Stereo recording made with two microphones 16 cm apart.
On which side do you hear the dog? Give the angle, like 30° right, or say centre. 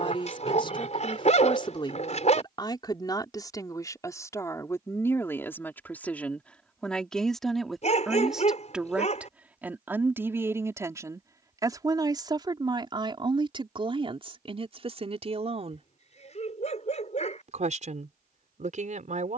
50° left.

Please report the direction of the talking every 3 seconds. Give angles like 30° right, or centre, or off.
30° left, 20° left, centre, 20° right, 30° right, 40° right, 50° right.